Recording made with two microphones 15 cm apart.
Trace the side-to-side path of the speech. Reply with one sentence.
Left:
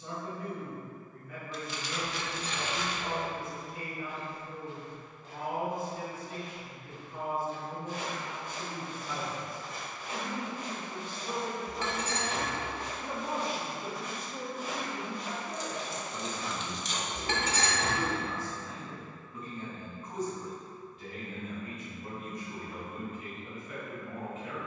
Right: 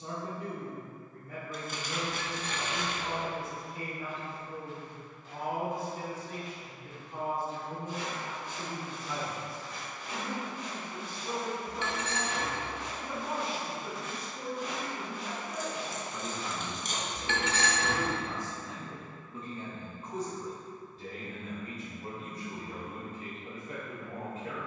In this clip you hear the speech move from right to left and back again.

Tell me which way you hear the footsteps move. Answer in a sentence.
You can hear the footsteps go left and come back.